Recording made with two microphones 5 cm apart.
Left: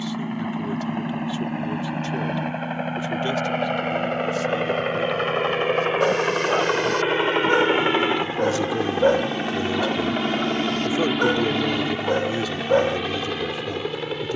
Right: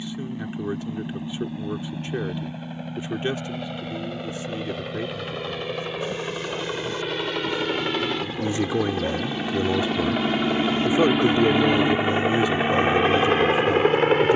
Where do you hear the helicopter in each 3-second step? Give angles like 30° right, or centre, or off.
60° left, 50° left, 30° left, centre, 40° right.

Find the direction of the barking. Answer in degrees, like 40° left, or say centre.
70° left.